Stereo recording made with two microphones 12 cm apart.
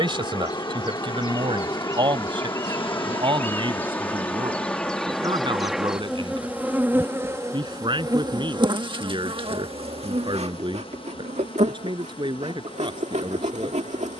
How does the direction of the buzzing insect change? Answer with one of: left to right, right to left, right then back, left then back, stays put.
left to right.